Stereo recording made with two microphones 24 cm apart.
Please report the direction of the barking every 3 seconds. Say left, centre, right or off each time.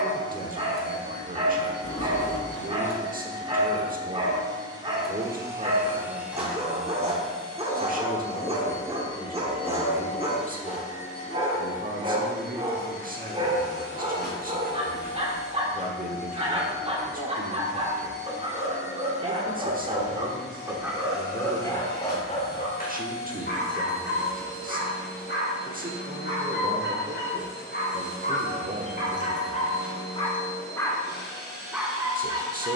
right, right, right, right, right, right, right, left, left, left, centre.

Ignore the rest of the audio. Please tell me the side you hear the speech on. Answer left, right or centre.
right.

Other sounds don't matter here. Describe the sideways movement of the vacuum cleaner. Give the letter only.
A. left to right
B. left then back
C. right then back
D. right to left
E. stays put
D.